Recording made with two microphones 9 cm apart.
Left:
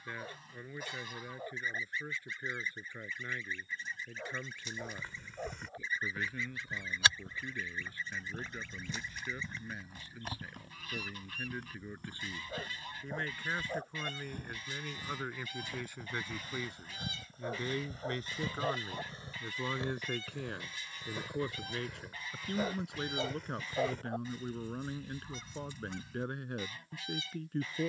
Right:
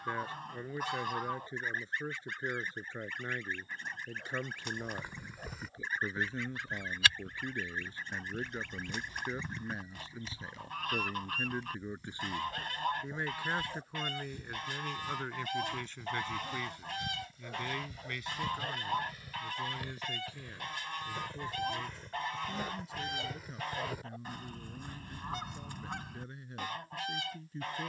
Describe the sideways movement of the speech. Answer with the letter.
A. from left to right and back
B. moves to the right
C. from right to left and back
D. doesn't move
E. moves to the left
E.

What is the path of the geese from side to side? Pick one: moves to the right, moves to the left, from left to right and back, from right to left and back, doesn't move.
doesn't move.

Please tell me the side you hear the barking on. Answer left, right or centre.
left.